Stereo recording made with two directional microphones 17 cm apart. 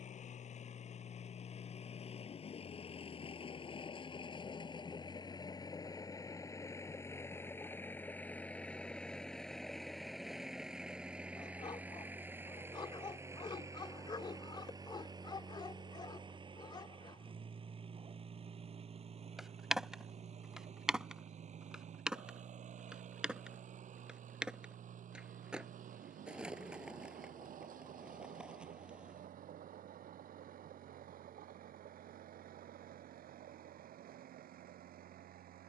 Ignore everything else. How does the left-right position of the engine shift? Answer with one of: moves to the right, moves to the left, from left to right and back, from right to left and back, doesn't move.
moves to the right.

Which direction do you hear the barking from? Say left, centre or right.
left.